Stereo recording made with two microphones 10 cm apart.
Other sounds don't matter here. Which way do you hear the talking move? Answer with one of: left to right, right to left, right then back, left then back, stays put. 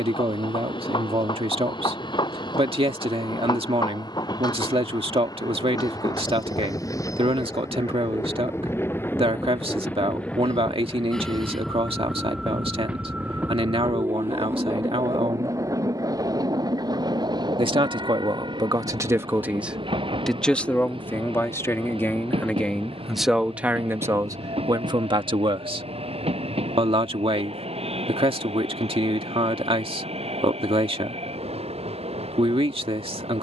left then back.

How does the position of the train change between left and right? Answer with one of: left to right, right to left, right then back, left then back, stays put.
left to right.